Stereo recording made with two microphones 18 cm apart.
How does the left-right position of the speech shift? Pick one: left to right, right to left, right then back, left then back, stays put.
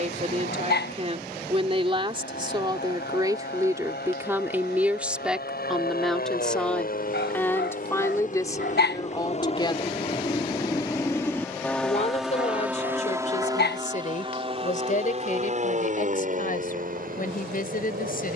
right to left.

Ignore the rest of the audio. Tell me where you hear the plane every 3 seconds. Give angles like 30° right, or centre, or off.
80° left, 70° left, 60° left, 20° left, 20° right, 40° right.